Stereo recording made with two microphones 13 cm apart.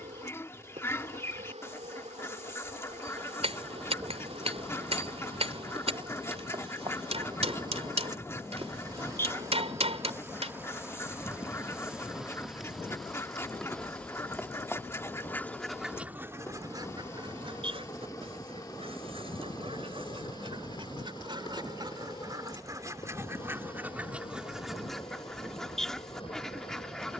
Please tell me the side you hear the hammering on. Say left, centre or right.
right.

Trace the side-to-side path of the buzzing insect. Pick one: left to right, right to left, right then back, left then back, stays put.
right to left.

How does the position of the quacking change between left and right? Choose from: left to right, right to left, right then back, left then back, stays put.
right then back.